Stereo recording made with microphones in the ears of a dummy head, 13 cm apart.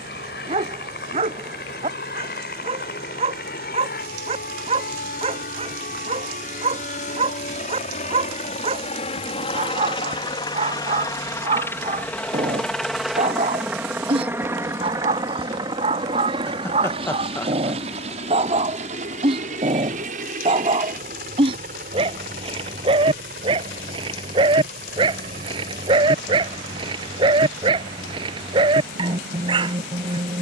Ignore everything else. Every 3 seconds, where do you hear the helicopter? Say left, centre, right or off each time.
left, left, left, left, centre, right, right, right, right, right.